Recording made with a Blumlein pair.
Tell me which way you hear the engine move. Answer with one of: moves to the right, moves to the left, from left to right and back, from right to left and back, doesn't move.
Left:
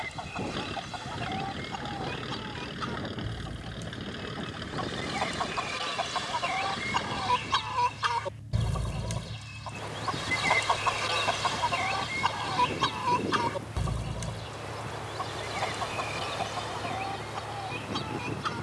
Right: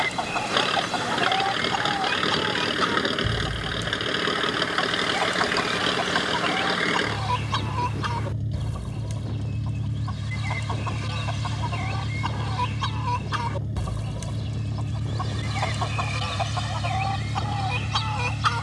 doesn't move.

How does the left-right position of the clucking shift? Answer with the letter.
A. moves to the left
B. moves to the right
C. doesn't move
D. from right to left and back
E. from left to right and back
D.